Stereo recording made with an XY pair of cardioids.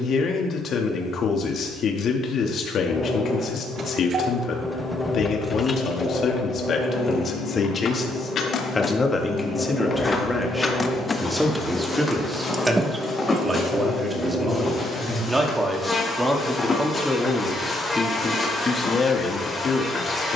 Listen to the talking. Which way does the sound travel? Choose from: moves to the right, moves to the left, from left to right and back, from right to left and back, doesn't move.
from left to right and back.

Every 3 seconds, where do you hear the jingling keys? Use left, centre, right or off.
off, centre, left, left, right, off, off.